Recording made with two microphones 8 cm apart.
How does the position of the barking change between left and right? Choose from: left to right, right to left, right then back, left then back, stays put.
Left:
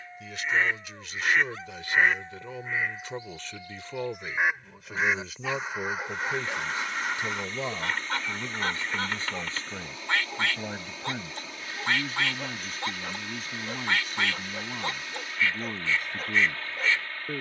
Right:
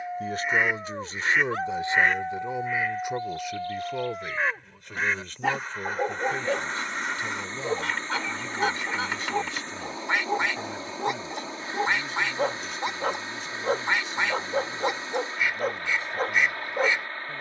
stays put.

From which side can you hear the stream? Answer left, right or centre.
right.